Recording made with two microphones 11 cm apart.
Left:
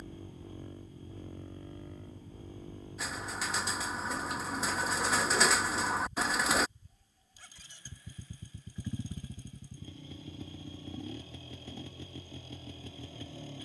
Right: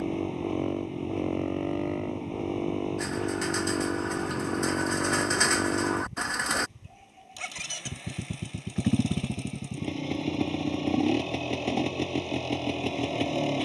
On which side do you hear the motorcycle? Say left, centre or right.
right.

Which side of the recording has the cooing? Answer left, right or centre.
centre.